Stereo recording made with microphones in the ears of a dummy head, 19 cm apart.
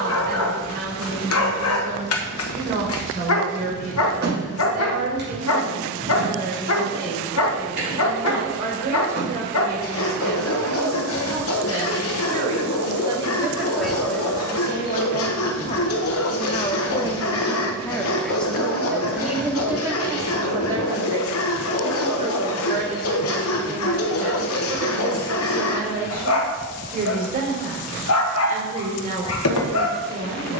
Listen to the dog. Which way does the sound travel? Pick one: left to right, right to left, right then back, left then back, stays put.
stays put.